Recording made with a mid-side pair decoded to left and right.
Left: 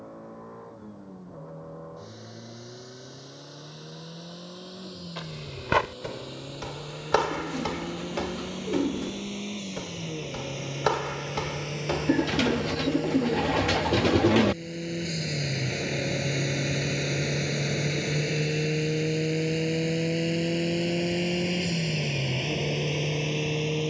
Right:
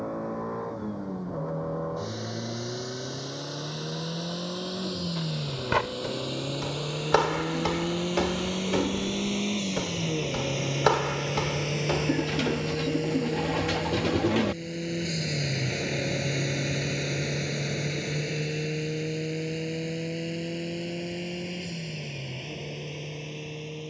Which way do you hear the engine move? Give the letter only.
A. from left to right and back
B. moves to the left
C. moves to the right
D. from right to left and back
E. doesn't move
B.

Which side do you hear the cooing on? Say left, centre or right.
left.